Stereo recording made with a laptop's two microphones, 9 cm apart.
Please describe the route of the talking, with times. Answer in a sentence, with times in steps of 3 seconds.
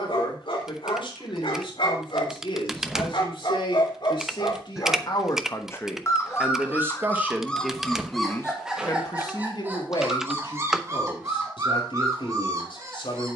In this clip you hear the talking on the left from 0 s, in the centre from 6 s and on the left from 9 s.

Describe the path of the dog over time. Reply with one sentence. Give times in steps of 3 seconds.
You can hear the dog on the left from 0 s, in the centre from 6 s and on the right from 9 s.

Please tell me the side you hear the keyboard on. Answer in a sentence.
In this clip you hear the keyboard in the centre.